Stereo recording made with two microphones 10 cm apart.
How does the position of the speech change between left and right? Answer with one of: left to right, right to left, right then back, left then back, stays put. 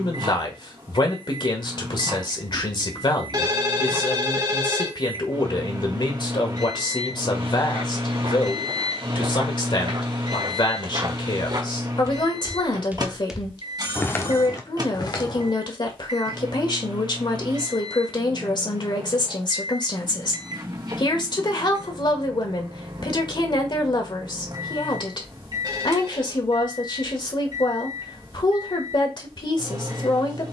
stays put.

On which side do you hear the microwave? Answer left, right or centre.
right.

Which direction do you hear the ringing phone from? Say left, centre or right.
right.